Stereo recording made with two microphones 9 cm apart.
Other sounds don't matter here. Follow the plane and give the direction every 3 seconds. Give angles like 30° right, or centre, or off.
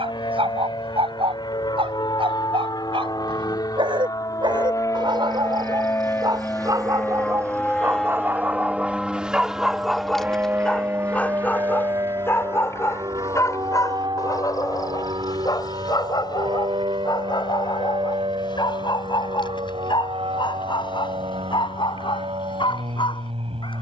60° left, 40° left, 10° left, 20° right, 40° right, 60° right, 60° right, 70° right.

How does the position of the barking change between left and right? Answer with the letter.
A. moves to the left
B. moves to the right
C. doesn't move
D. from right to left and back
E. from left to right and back
A.